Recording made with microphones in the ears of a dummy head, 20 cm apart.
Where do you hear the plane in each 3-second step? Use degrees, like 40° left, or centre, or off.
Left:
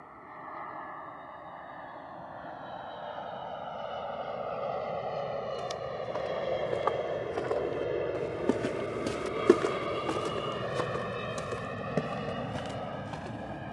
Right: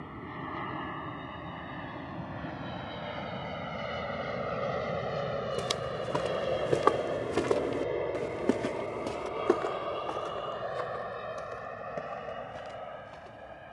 50° right, 30° right, centre, 30° left, 50° left.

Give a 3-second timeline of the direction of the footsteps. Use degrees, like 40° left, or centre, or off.
off, 70° right, 40° right, 50° left, 70° left.